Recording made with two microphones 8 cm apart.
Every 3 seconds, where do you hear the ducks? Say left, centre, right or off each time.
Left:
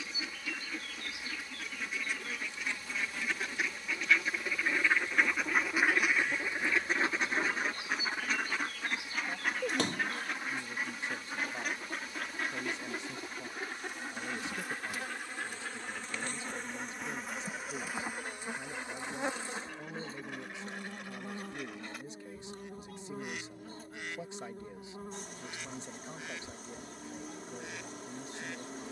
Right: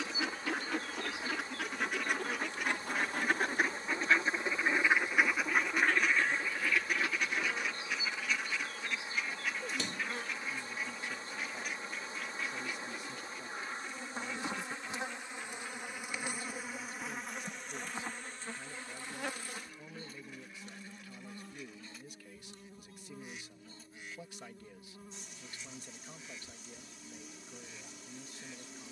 right, right, left, left, left, left, left, left, left, left.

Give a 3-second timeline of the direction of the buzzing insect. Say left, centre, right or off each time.
right, right, right, right, right, centre, left, left, left, left.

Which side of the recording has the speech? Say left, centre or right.
left.